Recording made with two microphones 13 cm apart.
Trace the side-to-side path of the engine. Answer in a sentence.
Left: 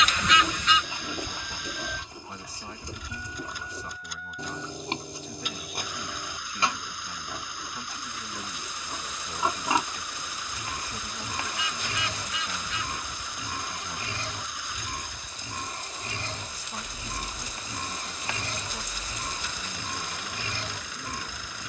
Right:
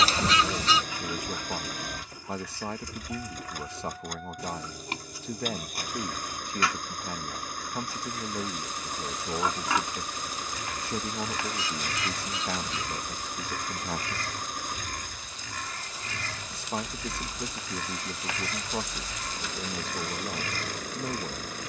You can hear the engine stay put.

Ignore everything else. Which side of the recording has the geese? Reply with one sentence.
You can hear the geese on the right.